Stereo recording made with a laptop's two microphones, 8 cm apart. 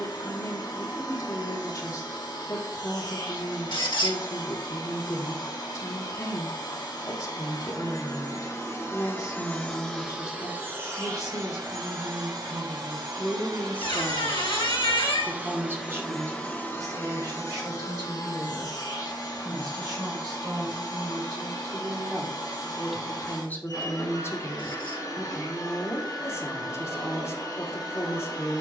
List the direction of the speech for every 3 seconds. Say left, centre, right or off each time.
left, left, left, left, left, right, right, centre, left, left.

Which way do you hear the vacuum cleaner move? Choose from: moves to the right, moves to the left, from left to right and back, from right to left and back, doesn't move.
from left to right and back.